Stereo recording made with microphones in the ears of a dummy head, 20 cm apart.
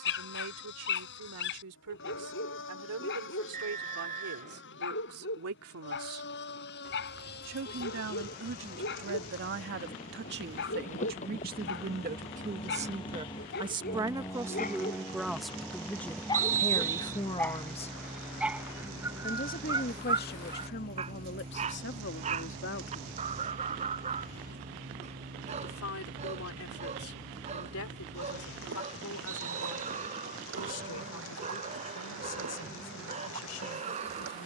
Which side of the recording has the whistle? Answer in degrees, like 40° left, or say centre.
40° right.